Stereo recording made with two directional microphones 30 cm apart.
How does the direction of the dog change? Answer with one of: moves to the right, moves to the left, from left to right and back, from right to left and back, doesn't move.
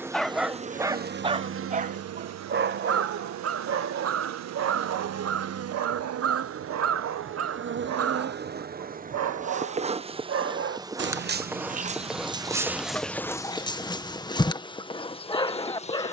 from left to right and back.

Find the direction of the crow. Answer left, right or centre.
right.